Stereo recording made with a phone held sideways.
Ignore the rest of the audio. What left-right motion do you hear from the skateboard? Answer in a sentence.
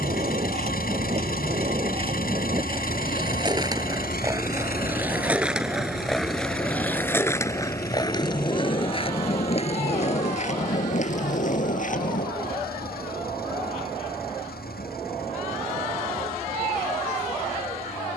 You can hear the skateboard go from the right side to the left.